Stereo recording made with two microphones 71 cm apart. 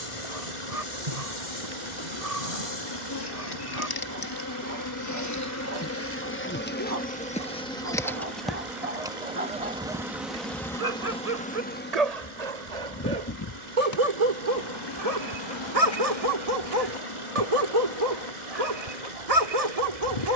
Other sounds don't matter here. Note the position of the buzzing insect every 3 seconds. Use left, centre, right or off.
left, left, centre, centre, left, left, left.